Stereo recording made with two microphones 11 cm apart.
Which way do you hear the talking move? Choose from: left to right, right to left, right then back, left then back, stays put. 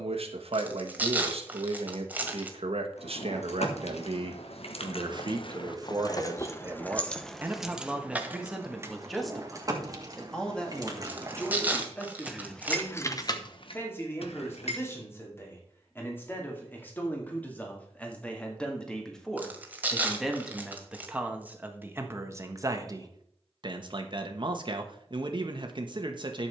left then back.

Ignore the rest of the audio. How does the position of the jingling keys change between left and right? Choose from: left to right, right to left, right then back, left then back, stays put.
right then back.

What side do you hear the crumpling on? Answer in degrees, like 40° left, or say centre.
10° right.